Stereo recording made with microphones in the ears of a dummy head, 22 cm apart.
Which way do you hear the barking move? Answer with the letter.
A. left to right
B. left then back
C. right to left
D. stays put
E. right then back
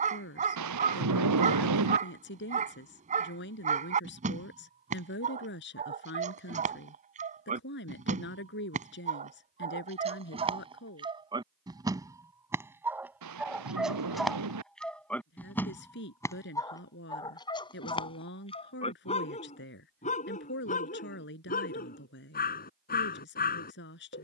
C.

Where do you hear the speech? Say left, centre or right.
left.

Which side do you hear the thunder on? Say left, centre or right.
right.